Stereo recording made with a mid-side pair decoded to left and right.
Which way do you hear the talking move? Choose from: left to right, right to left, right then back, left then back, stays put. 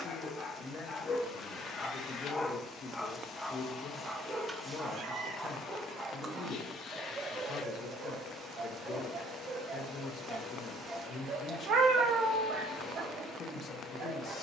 stays put.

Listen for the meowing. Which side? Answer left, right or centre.
right.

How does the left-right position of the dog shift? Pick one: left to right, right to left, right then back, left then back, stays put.
left to right.